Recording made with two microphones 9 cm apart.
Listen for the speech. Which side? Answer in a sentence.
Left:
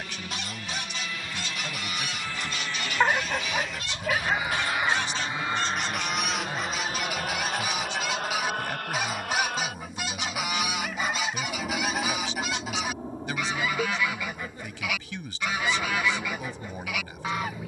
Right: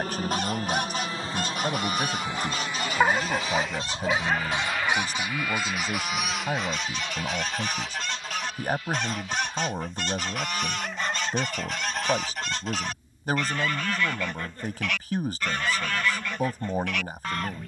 You can hear the speech on the right.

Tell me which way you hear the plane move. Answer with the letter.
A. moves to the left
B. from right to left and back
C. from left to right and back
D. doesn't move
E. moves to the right
A.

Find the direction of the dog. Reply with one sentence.
You can hear the dog in the centre.